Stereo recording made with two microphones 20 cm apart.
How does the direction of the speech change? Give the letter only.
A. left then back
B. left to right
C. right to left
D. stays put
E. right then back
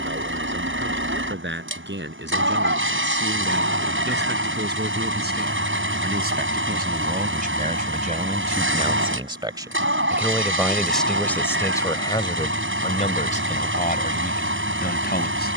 C.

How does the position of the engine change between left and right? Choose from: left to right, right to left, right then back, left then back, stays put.
stays put.